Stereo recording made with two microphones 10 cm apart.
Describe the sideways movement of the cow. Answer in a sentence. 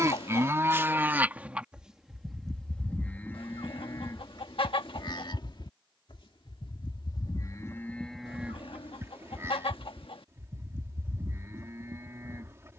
In this clip you hear the cow go left and come back.